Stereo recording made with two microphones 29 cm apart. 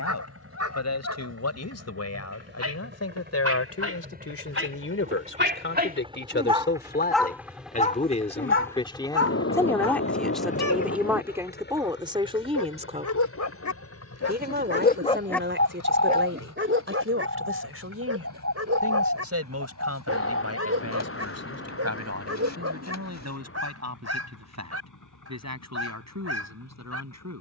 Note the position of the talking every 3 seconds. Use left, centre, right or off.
left, left, left, centre, right, right, right, right, right.